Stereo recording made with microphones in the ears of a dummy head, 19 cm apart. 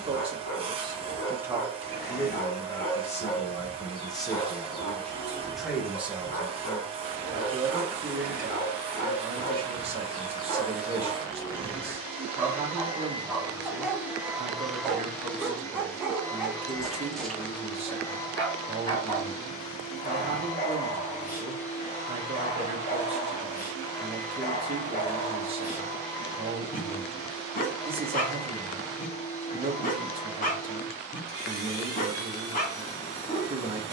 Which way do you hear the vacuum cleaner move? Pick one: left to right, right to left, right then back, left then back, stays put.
right to left.